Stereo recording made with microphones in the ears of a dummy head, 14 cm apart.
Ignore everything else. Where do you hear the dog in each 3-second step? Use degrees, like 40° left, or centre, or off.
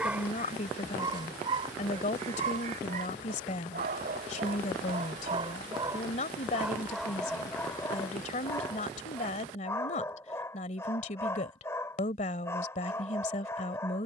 30° right, 40° right, 10° left, 20° left, 20° left.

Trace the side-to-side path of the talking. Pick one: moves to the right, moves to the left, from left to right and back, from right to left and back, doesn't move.
doesn't move.